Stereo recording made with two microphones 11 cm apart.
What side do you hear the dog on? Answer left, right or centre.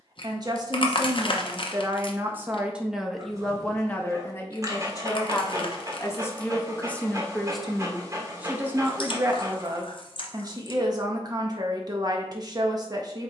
right.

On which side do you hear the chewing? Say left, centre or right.
left.